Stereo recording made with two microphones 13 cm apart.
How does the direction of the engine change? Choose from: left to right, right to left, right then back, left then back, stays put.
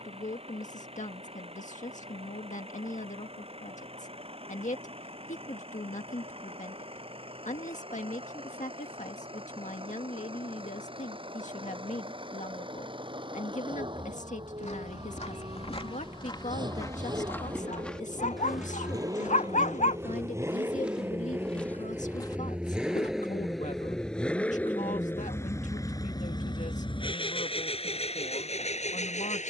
right to left.